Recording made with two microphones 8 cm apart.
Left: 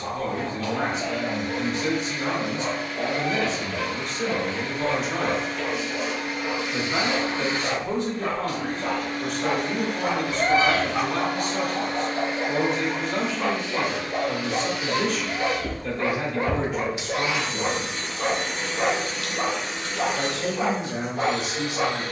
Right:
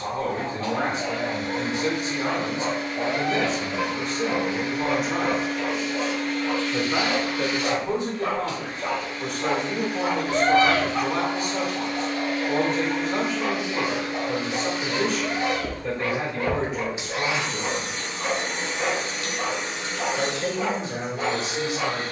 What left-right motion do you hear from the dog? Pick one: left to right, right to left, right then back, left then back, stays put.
right to left.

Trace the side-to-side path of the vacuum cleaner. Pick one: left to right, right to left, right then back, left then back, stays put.
left then back.